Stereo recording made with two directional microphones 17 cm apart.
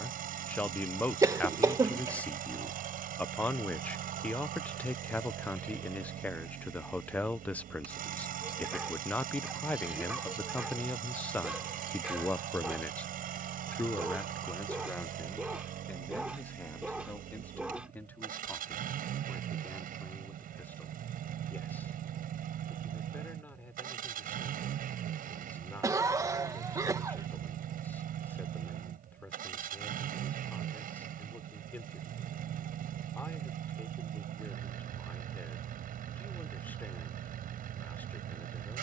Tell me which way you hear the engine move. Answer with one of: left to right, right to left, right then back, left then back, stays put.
stays put.